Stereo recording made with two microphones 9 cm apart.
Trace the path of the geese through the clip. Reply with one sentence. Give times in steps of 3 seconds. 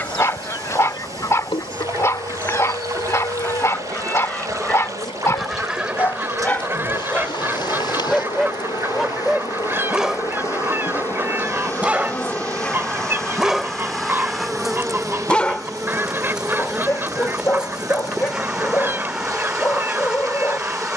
In this clip you hear the geese on the left from 0 s, in the centre from 3 s and on the right from 6 s.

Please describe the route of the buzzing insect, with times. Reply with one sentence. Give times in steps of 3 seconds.
In this clip you hear the buzzing insect on the left from 0 s and in the centre from 12 s.